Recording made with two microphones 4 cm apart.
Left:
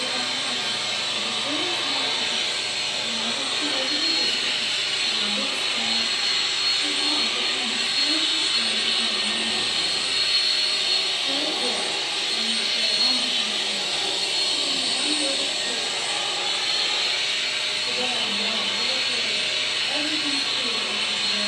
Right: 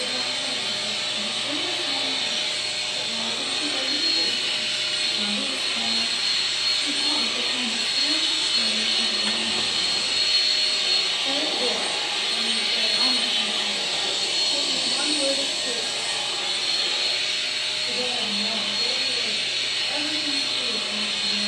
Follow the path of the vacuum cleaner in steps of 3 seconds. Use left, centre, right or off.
left, left, left, centre, centre, left, left.